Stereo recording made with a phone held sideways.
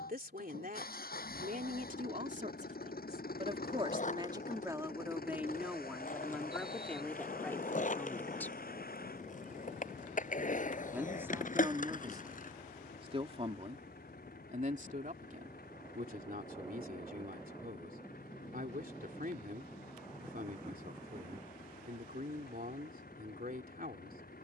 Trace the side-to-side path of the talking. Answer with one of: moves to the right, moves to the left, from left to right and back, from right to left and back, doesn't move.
from right to left and back.